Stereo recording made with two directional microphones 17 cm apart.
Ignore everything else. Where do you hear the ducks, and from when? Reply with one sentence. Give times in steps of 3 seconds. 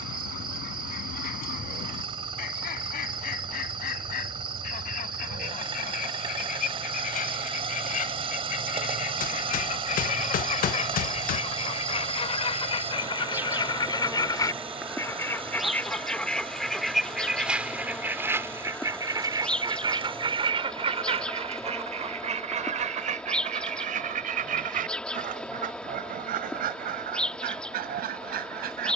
In this clip you hear the ducks on the left from 0 s, in the centre from 15 s and on the right from 18 s.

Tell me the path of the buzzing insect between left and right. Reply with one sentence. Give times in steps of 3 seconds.
In this clip you hear the buzzing insect on the right from 0 s and in the centre from 12 s.